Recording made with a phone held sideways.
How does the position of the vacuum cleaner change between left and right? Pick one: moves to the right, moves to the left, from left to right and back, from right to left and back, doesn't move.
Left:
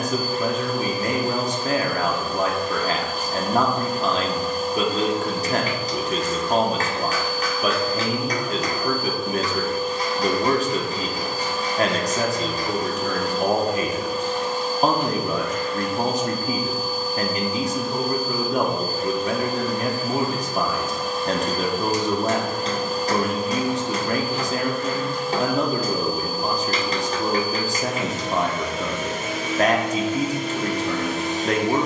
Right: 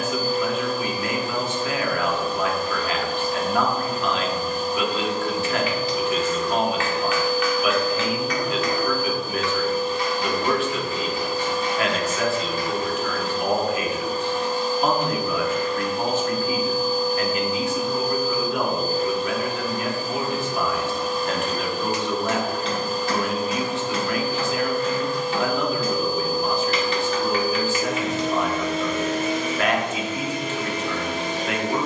doesn't move.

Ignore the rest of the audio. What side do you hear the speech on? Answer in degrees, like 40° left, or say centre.
40° left.